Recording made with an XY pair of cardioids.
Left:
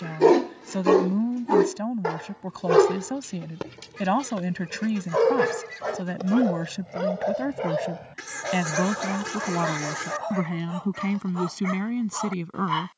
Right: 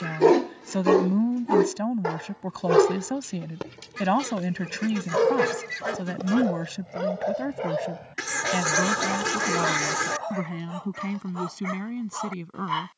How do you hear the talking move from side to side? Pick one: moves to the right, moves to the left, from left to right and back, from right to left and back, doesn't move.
moves to the left.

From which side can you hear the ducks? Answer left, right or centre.
right.